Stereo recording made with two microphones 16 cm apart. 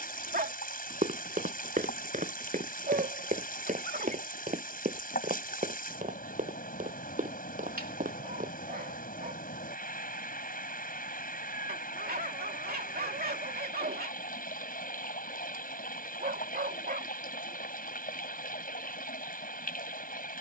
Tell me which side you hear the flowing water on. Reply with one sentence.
In this clip you hear the flowing water on the left.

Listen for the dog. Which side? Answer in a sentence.
In this clip you hear the dog on the right.